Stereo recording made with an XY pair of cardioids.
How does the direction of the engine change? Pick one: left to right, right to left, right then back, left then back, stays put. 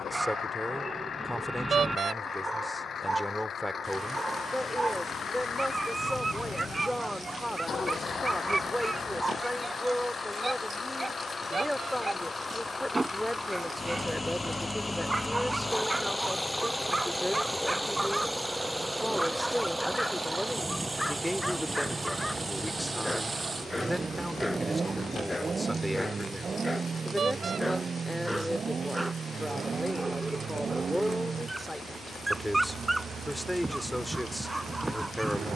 left to right.